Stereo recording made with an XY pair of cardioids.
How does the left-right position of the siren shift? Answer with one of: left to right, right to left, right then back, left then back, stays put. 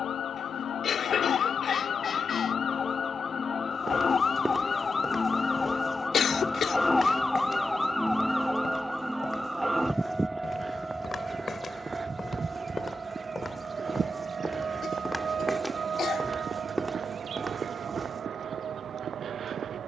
left to right.